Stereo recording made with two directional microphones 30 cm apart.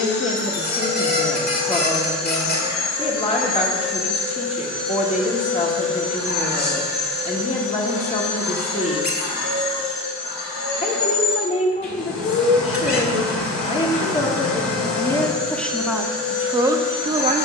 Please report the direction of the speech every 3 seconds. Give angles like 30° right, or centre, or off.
20° left, 20° left, 20° left, 20° left, 20° left, 10° right.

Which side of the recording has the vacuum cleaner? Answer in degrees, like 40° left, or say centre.
60° left.